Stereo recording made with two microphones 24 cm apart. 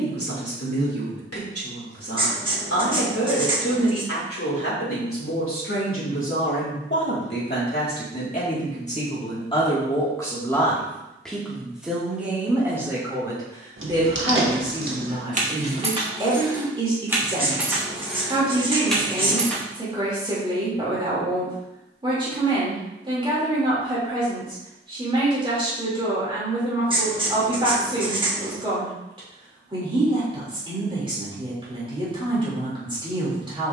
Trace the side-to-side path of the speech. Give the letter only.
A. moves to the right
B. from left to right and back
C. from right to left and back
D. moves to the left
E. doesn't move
A.